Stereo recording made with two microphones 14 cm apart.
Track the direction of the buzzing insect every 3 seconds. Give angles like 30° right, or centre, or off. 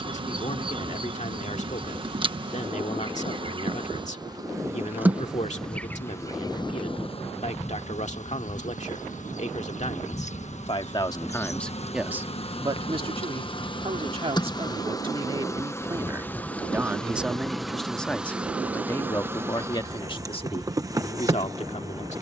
40° right, 20° right, 50° left, 50° left, 40° left, 10° left, 20° right, 20° right.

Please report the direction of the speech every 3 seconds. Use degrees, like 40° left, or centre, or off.
60° left, 60° left, 60° left, 40° left, 40° right, 20° right, 30° left, 50° left.